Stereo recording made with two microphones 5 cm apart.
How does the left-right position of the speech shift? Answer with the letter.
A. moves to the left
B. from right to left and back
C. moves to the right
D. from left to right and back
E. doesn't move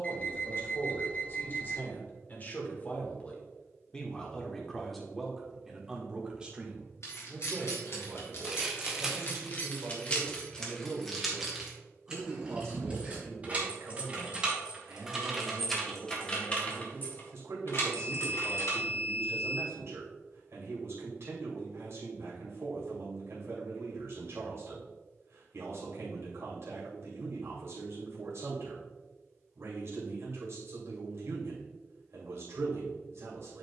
C.